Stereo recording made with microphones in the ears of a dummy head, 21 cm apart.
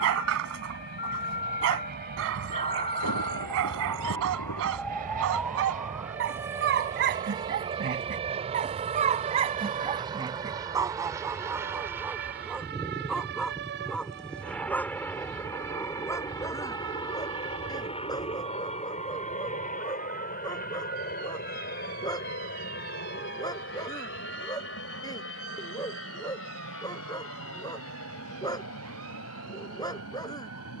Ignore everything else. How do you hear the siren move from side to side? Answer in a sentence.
In this clip you hear the siren travel towards the right.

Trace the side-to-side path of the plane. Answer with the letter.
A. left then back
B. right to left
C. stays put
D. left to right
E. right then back
B.